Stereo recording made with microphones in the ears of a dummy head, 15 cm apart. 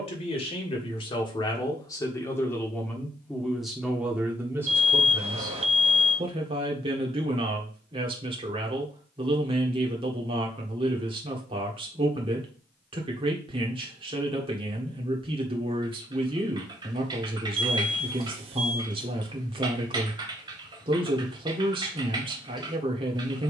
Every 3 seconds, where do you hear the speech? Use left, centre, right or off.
left, centre, right, right, right, right, right, right.